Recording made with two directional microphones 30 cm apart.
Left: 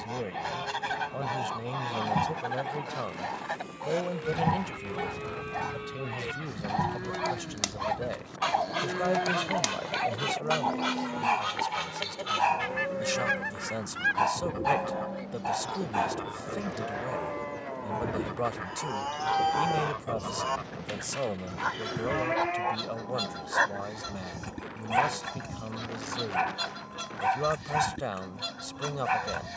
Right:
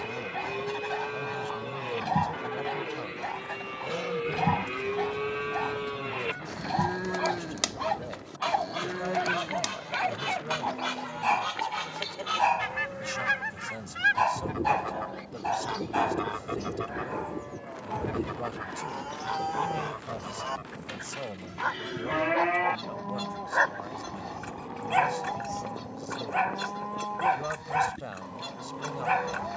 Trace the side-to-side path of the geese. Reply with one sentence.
You can hear the geese move from left to right and back again.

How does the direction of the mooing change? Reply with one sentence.
You can hear the mooing move from right to left and back again.